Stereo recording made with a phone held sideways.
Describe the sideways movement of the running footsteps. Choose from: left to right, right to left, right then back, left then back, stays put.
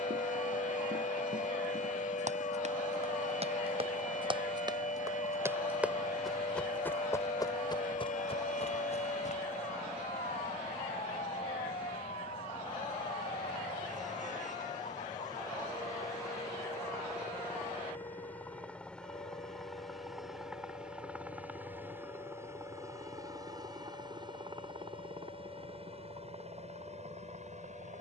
right to left.